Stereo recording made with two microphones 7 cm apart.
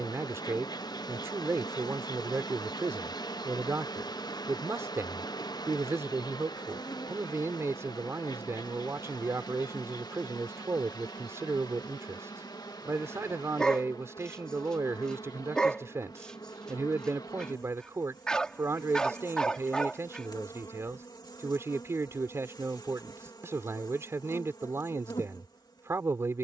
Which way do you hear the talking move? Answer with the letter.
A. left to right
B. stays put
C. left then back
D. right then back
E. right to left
B.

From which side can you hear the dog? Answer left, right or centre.
centre.